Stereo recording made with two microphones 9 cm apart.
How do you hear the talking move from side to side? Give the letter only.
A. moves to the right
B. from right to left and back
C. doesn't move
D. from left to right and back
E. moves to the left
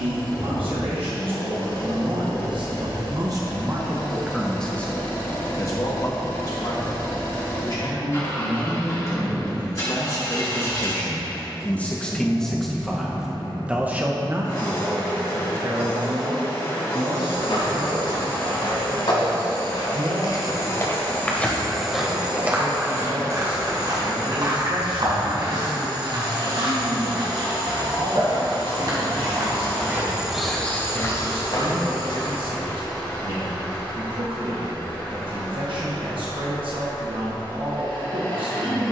B.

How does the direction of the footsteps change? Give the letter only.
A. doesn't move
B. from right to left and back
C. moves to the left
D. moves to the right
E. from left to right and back
E.